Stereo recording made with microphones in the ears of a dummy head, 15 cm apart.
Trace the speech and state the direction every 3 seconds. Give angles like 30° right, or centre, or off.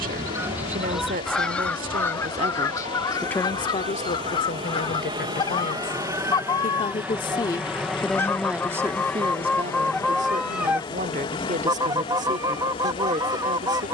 50° right, 50° left, 20° left, 40° right, 50° right.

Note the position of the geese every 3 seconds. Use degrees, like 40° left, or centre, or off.
centre, 30° left, 20° left, centre, 20° right.